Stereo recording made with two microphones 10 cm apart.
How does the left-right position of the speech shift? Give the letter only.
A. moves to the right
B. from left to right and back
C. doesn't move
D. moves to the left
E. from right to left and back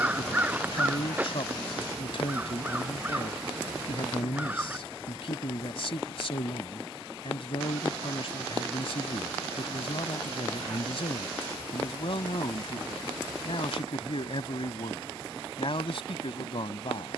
C.